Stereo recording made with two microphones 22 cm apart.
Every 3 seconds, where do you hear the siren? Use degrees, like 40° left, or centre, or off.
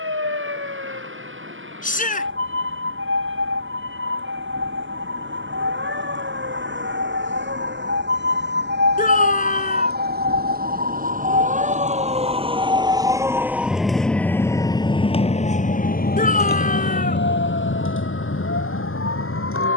70° right, 60° right, 60° right, 40° right, 10° right, 50° left, 70° left.